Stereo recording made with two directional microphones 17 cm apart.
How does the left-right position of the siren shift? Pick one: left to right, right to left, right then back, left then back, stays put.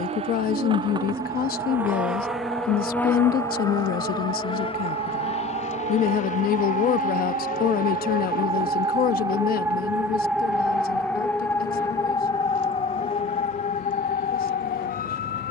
right to left.